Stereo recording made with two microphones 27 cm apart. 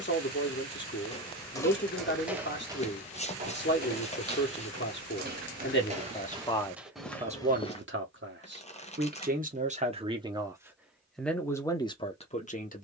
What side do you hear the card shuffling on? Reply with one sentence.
In this clip you hear the card shuffling on the left.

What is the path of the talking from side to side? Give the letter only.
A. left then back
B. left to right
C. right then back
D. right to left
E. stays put
C.